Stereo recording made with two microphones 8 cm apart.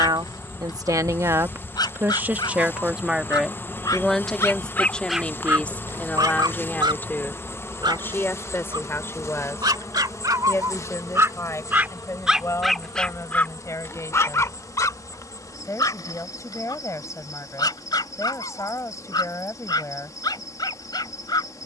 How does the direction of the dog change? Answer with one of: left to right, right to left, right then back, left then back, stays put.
right then back.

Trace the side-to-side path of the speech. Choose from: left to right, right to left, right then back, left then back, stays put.
right to left.